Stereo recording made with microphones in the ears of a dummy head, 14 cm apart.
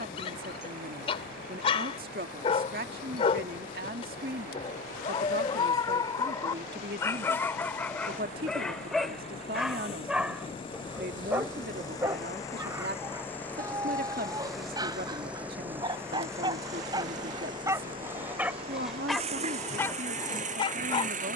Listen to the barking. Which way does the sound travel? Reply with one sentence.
In this clip you hear the barking go right and come back.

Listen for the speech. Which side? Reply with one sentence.
In this clip you hear the speech on the right.